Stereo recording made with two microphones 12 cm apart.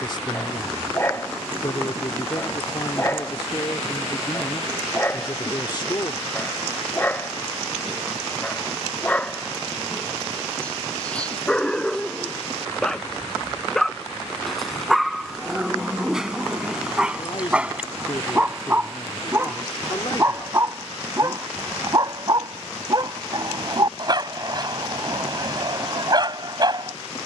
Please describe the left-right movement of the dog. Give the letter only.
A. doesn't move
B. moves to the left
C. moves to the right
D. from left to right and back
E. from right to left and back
C.